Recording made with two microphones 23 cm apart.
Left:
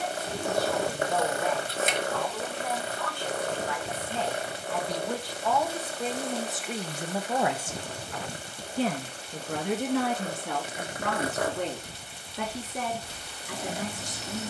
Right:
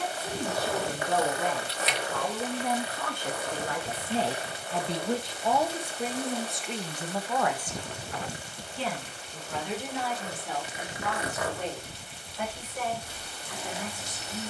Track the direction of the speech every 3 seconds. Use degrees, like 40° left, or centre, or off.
50° right, 30° right, 10° left, 60° left, 70° left.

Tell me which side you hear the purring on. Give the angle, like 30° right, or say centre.
50° left.